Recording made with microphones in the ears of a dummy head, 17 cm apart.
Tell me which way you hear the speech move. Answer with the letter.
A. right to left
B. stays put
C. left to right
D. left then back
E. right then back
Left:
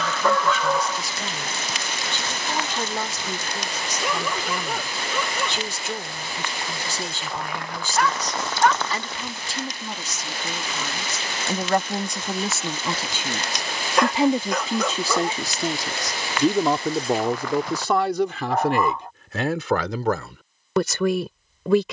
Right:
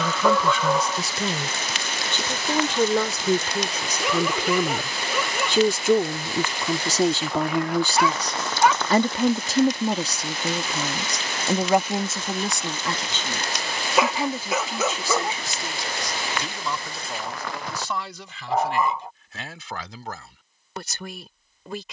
A.